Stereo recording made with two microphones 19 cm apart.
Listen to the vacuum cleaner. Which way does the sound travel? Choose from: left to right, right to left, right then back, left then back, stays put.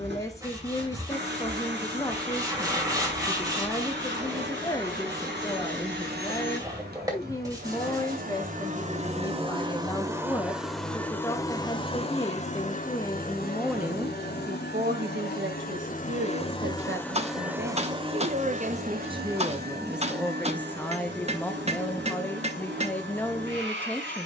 left then back.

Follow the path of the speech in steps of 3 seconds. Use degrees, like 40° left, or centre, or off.
20° left, 20° left, 20° left, 20° left, centre, 70° right, 20° right, 10° left.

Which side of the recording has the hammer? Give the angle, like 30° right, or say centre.
30° right.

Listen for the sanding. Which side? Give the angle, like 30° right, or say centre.
20° right.